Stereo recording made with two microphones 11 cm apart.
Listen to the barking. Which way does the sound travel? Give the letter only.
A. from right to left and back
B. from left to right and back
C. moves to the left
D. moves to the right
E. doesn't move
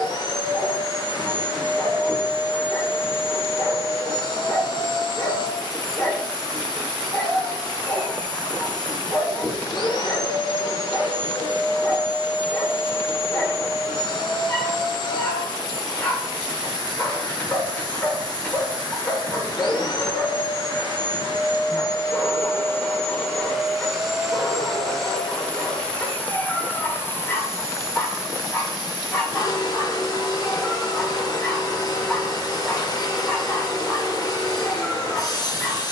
E.